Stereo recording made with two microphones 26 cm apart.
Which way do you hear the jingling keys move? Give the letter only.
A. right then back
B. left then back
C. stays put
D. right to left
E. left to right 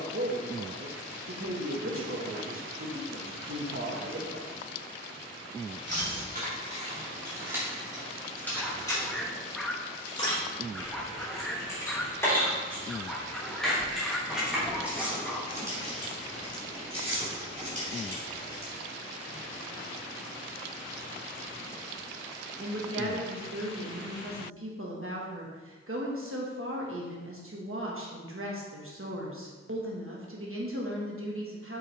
B.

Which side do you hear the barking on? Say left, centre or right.
centre.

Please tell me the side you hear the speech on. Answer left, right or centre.
right.